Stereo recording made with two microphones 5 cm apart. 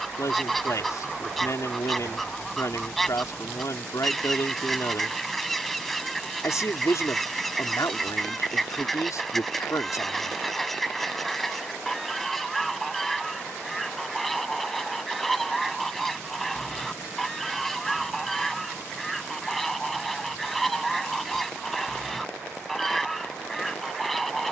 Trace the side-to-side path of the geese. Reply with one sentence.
You can hear the geese stay put.